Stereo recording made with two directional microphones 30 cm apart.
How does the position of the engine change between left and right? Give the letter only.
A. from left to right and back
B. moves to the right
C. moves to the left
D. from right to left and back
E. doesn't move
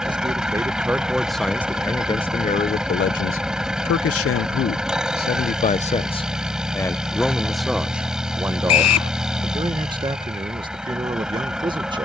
E.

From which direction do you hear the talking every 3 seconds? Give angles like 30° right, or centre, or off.
10° left, 40° left, centre, 20° right.